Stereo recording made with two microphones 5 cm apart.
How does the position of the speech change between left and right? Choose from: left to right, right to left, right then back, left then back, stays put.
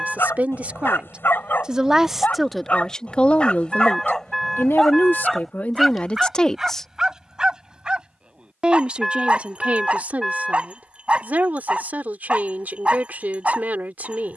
left then back.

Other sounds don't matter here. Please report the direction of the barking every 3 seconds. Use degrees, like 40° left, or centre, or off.
40° left, 10° left, 20° right, 20° right, 20° right.